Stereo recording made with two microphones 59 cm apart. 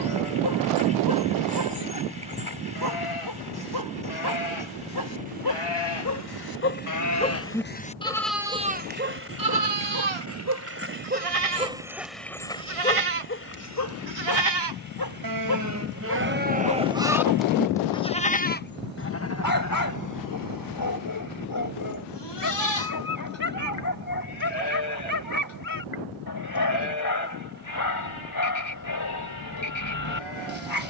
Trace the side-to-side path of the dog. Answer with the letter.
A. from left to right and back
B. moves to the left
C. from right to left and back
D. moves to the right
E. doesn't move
A.